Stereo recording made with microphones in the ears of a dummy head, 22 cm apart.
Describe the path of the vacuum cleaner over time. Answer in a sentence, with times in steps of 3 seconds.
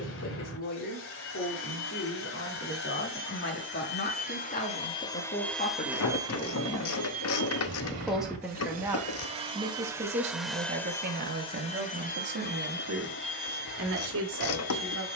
In this clip you hear the vacuum cleaner on the left from 0 s, on the right from 6 s, in the centre from 9 s and on the left from 12 s.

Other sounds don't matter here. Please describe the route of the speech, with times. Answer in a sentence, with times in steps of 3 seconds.
You can hear the speech on the left from 0 s, in the centre from 6 s and on the right from 9 s.